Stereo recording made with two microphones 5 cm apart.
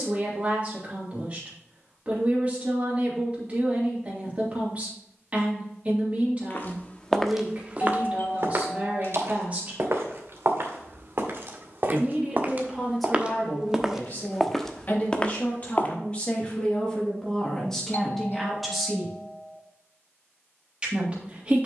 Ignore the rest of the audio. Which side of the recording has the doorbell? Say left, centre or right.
left.